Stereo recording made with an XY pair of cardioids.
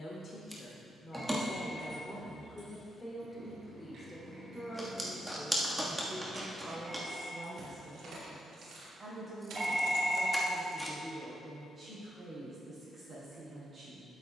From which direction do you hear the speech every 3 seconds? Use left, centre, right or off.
left, centre, right, right, right.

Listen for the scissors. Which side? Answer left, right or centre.
centre.